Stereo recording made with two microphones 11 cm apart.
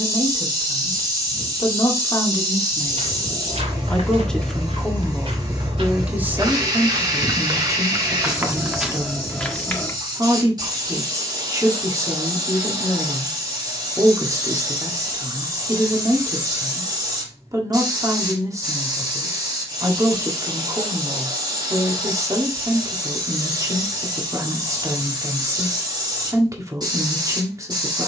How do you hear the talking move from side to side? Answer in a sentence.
In this clip you hear the talking move from left to right.